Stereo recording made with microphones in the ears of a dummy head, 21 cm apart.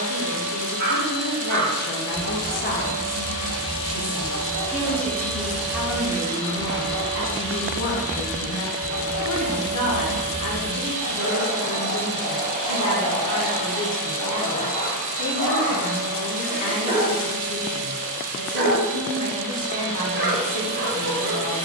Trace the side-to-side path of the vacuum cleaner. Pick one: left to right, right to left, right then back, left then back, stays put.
left to right.